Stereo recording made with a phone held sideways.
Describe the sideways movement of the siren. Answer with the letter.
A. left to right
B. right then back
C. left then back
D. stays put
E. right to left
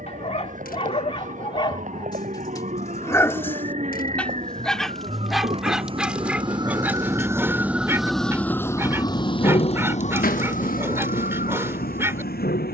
E.